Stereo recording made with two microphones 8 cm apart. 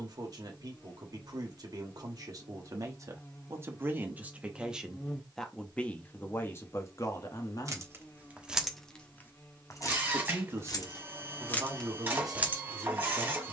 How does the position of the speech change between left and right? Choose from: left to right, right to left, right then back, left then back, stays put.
left then back.